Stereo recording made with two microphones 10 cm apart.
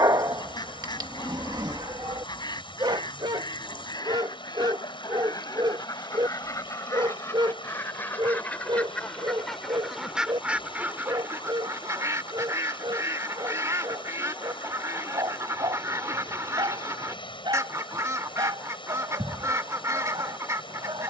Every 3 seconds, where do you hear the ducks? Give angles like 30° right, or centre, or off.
50° left, 40° left, 30° left, 10° right, 30° right, 30° right, 30° right.